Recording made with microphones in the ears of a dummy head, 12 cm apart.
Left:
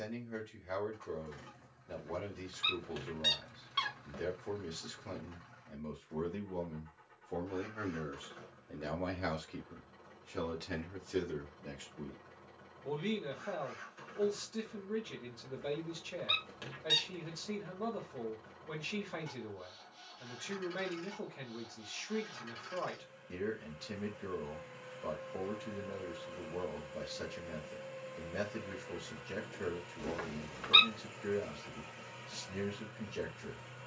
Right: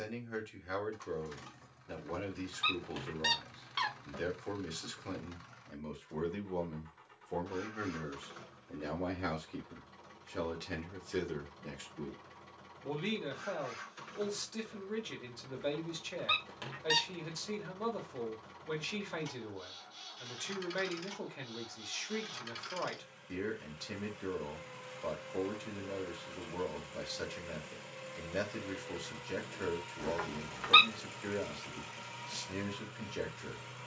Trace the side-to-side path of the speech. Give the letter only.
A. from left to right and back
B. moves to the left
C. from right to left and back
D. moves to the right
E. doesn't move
C.